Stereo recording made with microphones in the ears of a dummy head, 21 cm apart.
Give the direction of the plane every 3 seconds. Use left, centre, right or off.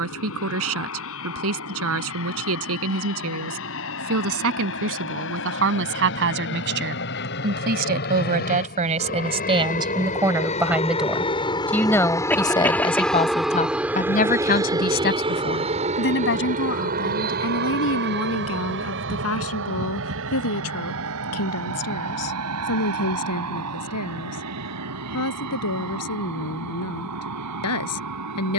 left, left, left, left, centre, right, right, right, right, right.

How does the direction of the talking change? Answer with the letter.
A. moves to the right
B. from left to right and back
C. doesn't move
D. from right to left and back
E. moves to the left
E.